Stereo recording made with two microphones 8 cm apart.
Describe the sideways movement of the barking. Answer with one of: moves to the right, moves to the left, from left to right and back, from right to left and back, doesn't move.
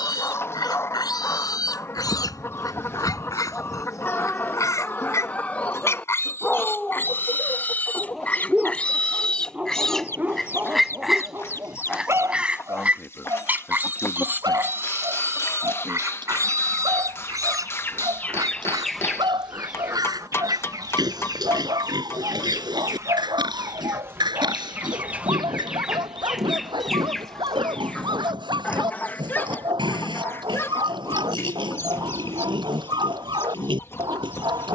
moves to the right.